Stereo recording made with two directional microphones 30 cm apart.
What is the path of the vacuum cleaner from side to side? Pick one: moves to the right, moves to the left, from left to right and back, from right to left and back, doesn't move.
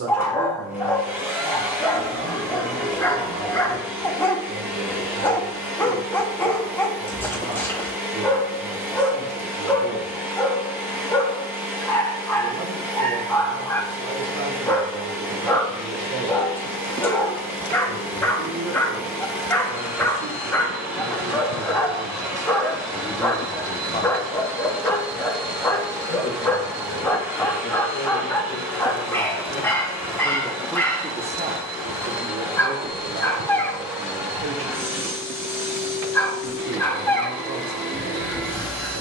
doesn't move.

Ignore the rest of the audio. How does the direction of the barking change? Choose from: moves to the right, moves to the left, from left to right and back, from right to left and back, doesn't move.
doesn't move.